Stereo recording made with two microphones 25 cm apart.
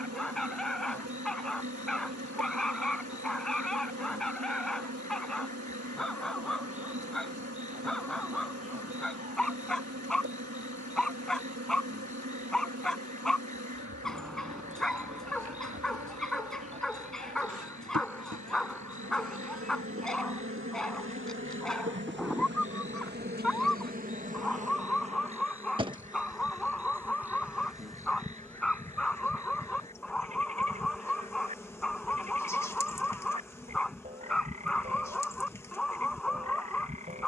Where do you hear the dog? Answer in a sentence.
In this clip you hear the dog in the centre.